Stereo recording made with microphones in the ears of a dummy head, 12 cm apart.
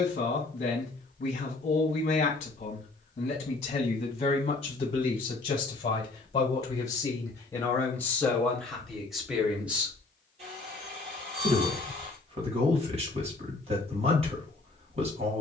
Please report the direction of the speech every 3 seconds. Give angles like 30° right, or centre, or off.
50° left, 40° left, 20° left, 20° right, 50° right.